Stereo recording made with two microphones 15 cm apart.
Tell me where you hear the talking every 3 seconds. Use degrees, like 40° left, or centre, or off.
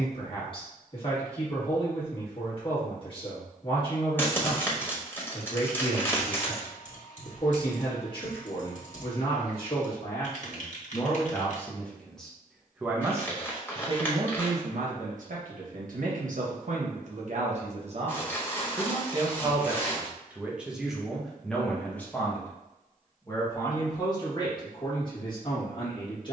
40° left, 40° left, 40° left, 30° left, 30° right, 60° right, 20° right, 10° left, 30° left.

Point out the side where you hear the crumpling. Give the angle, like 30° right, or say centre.
10° left.